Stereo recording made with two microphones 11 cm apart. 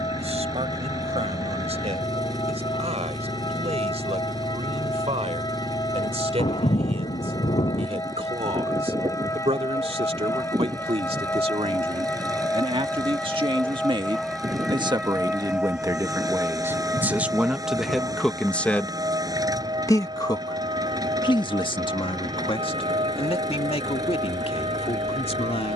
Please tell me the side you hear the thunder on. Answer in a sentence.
You can hear the thunder on the left.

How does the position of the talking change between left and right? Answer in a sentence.
In this clip you hear the talking travel towards the left.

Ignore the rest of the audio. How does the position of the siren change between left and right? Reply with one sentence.
In this clip you hear the siren move from left to right.